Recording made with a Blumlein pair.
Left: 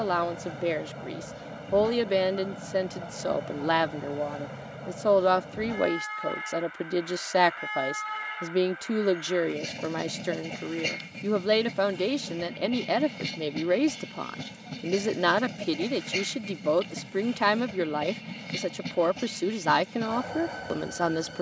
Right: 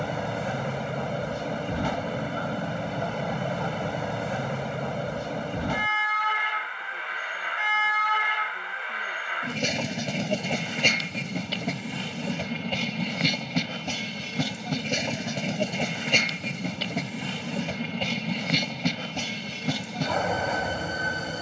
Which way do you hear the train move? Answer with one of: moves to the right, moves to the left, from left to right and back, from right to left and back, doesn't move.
doesn't move.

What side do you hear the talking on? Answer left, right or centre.
left.